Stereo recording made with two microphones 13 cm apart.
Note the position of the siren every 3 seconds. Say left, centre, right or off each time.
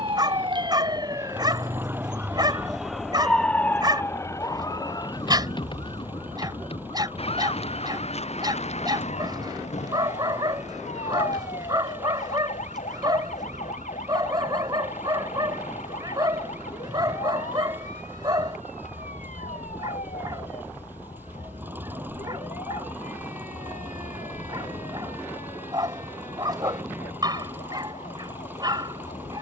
right, left, left, left, left, left, left, left, left, left.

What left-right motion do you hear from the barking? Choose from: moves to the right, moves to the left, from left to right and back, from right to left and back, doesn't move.
doesn't move.